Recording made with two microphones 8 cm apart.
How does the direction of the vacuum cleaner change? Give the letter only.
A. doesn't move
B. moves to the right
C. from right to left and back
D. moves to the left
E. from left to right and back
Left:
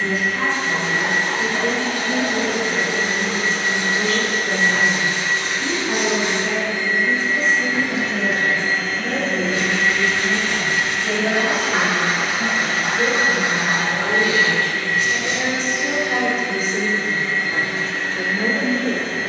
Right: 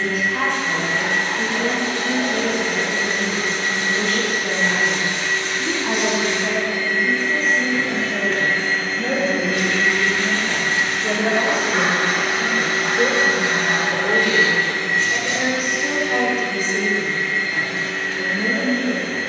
E.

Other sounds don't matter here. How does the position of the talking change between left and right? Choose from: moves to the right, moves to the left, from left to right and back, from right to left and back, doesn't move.
moves to the left.